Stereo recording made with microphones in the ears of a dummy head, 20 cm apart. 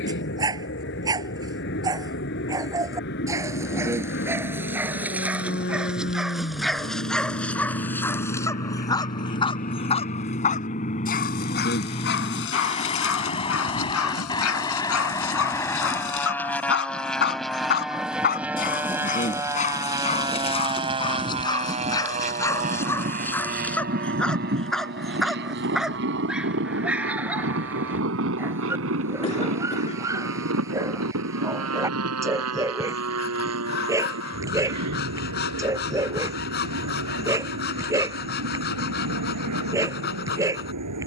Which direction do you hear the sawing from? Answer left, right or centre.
left.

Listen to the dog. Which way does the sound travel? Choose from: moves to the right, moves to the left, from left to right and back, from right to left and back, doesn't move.
from right to left and back.